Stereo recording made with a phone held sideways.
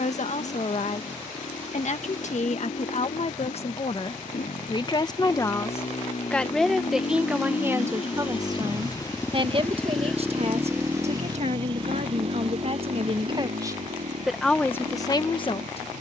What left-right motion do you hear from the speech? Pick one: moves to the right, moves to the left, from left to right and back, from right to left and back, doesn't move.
from left to right and back.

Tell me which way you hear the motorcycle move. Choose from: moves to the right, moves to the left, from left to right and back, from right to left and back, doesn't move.
moves to the right.